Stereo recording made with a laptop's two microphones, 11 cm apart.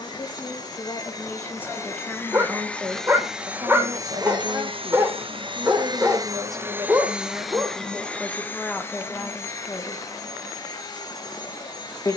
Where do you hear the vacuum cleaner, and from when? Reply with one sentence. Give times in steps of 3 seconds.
In this clip you hear the vacuum cleaner on the left from 0 s, on the right from 3 s, in the centre from 6 s and on the left from 9 s.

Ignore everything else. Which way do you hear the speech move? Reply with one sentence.
You can hear the speech go right and come back.